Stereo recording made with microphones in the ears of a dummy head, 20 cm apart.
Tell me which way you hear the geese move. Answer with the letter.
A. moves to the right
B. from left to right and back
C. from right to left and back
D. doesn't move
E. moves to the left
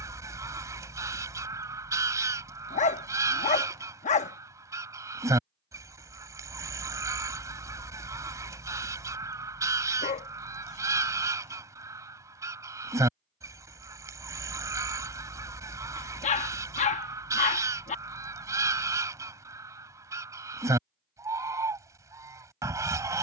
D.